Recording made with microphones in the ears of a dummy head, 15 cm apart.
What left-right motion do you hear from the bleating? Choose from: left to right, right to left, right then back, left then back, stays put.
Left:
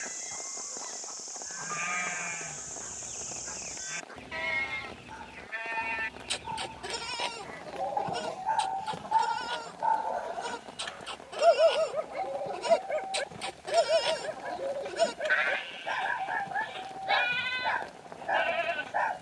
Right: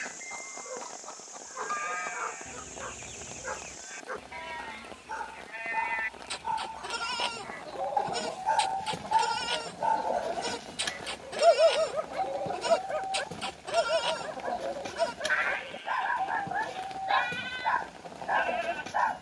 right then back.